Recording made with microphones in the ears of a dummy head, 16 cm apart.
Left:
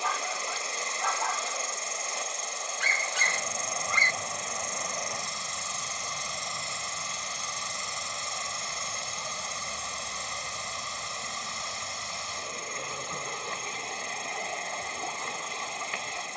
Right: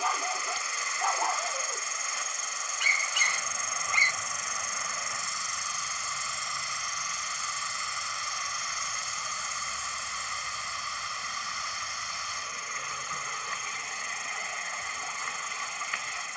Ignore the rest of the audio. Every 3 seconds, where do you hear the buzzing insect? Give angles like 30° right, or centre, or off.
70° right, 30° right, 10° left, 30° left, 40° left, 50° left.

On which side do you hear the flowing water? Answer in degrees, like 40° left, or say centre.
20° left.